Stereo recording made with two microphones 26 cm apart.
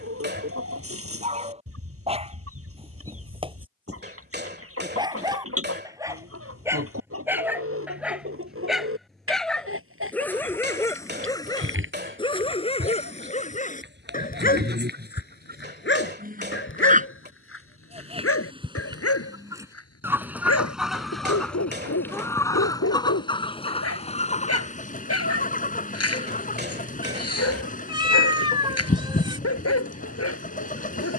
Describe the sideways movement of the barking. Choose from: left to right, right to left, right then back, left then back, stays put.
right to left.